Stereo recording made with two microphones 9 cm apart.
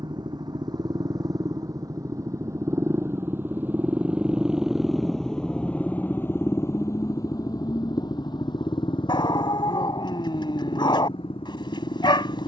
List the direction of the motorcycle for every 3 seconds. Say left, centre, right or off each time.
right, centre, left, left.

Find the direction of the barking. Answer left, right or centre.
left.